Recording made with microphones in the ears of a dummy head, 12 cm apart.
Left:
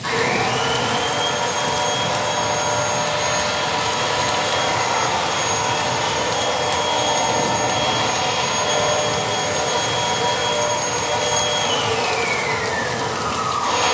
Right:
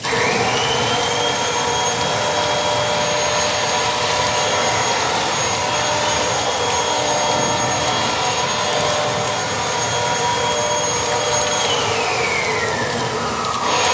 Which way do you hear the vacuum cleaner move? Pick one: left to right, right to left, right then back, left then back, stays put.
left then back.